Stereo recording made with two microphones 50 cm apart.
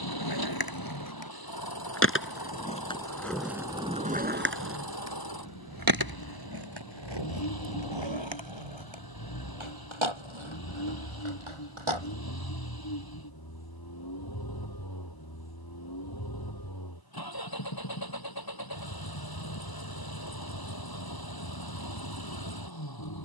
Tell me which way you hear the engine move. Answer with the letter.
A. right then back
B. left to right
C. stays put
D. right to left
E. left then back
C.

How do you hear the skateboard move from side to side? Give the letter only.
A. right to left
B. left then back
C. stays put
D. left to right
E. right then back
D.